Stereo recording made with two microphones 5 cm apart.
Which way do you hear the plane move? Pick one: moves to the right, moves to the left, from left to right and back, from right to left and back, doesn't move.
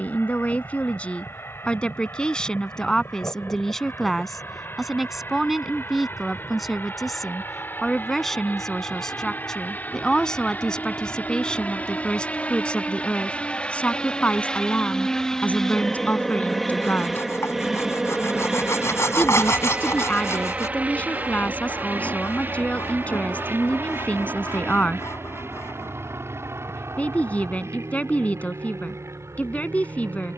moves to the right.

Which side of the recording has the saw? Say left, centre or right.
left.